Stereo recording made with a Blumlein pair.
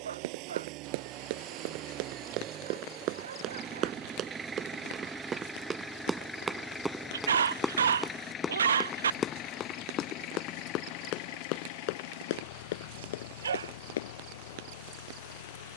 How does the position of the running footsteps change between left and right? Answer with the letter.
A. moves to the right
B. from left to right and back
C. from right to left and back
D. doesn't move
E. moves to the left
E.